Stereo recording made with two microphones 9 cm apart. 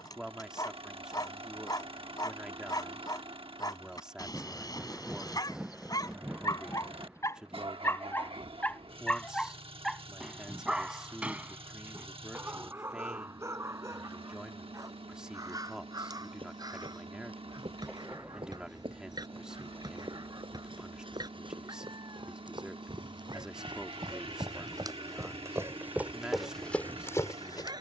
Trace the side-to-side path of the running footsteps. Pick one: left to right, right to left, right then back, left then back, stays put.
right to left.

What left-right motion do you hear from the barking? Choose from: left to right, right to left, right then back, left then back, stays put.
left to right.